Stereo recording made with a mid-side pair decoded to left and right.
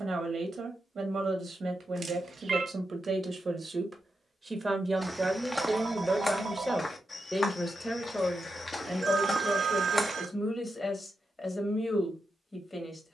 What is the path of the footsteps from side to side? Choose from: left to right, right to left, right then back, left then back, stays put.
left then back.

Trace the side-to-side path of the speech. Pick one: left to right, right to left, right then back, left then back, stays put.
right to left.